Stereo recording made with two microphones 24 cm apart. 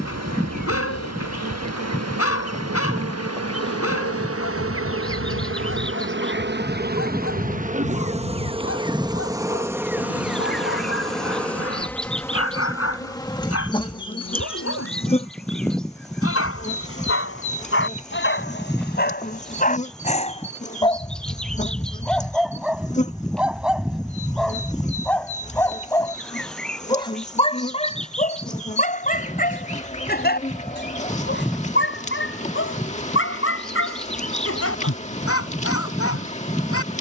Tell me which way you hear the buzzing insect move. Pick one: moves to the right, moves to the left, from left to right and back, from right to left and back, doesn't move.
moves to the left.